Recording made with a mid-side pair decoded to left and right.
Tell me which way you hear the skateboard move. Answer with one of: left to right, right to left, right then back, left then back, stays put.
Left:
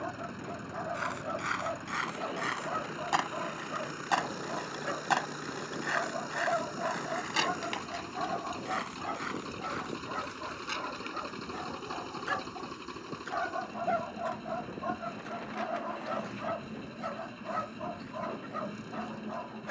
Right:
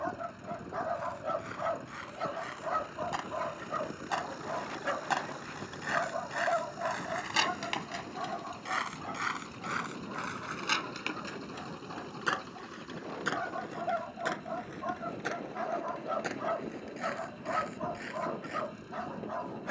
left to right.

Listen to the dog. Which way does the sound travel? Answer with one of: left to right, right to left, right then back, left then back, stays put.
left then back.